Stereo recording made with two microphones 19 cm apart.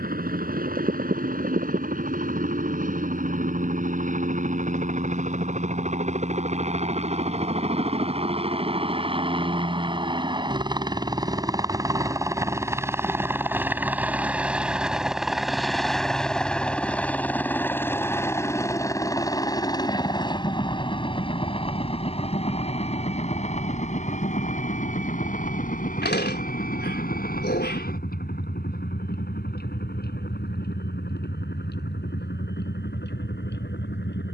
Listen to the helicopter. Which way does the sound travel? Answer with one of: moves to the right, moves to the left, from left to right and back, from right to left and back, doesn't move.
moves to the left.